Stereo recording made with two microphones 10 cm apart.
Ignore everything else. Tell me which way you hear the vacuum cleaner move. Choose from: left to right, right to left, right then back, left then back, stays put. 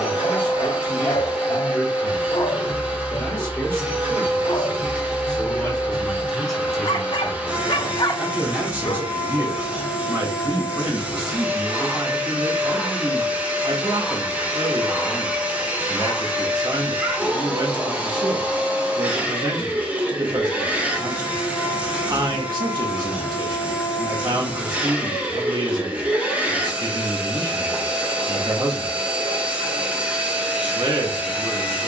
stays put.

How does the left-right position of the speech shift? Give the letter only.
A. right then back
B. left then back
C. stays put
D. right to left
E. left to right
E.